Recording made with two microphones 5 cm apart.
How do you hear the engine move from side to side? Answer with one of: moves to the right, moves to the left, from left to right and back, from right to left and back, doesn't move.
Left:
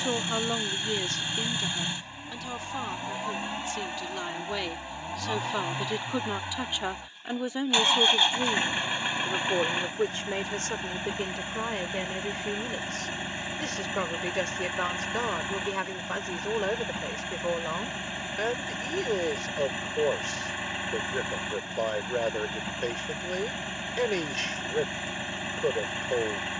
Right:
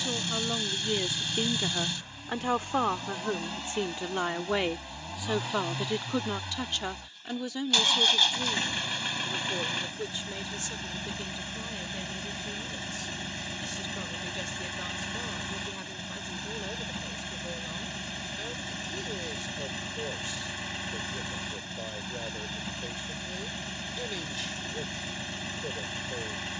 doesn't move.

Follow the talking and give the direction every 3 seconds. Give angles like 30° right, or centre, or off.
10° right, 20° right, 20° left, 50° left, 60° left, 60° left, 60° left, 60° left, 60° left.